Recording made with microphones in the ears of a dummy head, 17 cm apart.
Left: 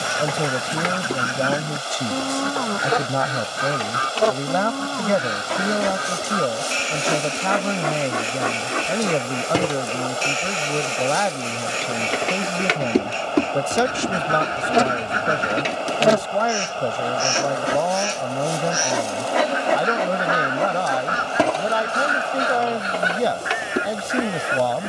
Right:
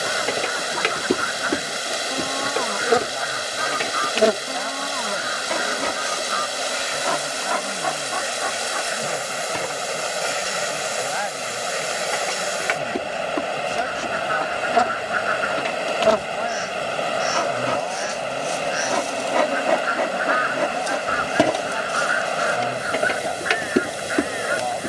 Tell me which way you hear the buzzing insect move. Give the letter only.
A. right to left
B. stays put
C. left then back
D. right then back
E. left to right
C.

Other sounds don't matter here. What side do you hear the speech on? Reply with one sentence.
In this clip you hear the speech on the left.